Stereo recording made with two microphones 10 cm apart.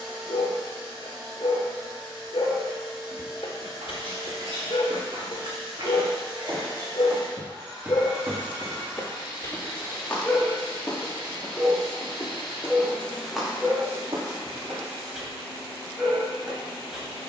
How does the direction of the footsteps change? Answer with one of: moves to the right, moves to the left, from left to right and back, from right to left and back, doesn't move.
from right to left and back.